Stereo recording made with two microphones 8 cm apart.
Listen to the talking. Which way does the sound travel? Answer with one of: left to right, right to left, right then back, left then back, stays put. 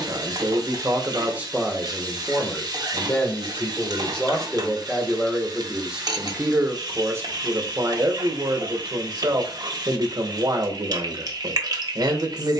left then back.